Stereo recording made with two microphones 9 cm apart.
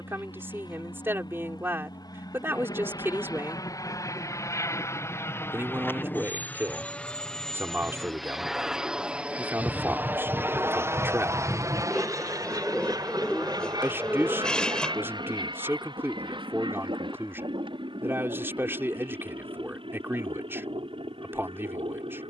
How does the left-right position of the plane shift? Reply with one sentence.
In this clip you hear the plane move to the right.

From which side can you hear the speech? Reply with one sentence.
You can hear the speech on the right.